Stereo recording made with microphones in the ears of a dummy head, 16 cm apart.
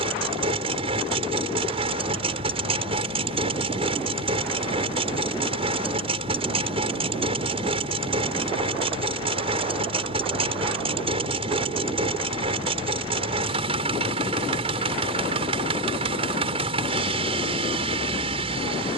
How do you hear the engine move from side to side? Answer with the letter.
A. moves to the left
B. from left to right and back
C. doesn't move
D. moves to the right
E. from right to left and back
C.